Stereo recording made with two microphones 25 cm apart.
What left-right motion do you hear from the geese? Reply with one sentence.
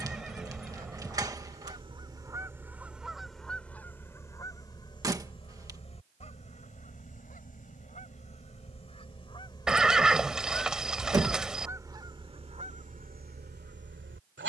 You can hear the geese move from right to left and back again.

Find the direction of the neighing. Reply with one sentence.
You can hear the neighing in the centre.